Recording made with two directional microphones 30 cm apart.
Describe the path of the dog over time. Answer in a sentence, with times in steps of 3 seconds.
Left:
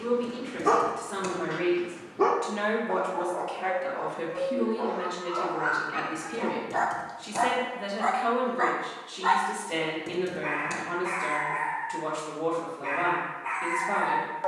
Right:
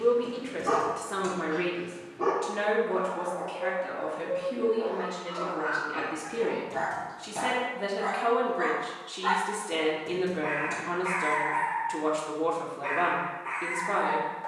In this clip you hear the dog on the left from 0 s, in the centre from 9 s and on the left from 12 s.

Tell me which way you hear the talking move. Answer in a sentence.
In this clip you hear the talking move from right to left and back again.